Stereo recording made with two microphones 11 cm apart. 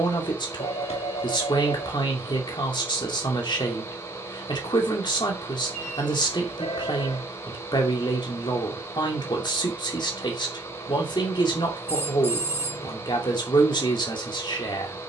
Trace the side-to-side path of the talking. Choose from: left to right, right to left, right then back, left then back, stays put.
stays put.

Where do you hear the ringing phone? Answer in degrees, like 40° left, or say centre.
80° left.